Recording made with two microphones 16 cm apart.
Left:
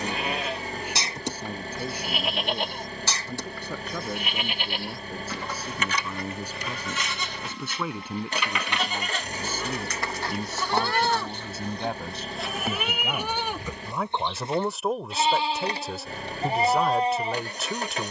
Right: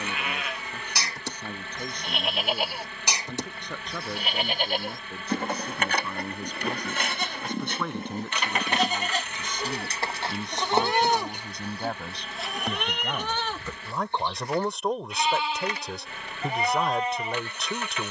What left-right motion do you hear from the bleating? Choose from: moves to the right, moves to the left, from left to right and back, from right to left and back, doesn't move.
from left to right and back.